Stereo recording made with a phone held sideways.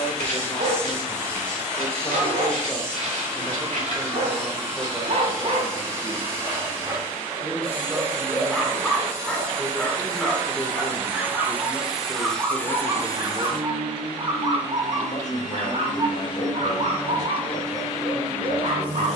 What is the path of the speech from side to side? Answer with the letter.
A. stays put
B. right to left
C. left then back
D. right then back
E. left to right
D.